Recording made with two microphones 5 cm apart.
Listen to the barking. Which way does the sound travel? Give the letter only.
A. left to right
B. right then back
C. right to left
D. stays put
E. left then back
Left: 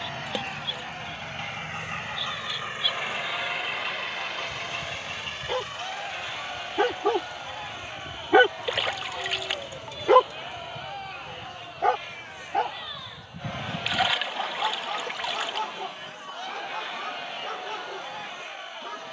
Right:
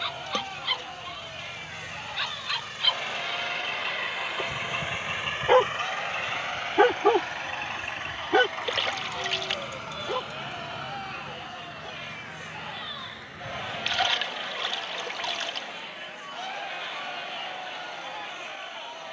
C.